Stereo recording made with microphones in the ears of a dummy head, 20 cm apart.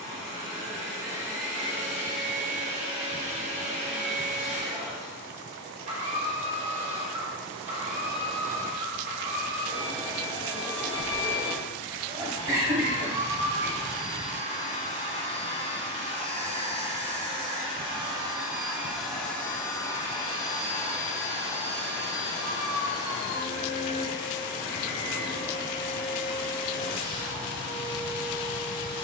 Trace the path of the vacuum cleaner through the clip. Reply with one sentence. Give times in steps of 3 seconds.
In this clip you hear the vacuum cleaner on the right from 0 s, in the centre from 18 s and on the left from 21 s.